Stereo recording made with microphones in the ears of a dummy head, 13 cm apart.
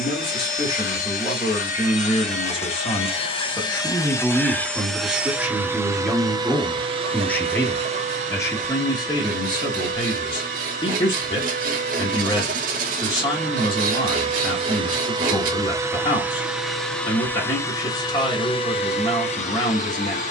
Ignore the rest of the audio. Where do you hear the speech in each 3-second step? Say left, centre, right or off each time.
left, centre, centre, left, left, left, left.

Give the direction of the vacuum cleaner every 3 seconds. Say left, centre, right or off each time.
left, centre, right, right, right, centre, left.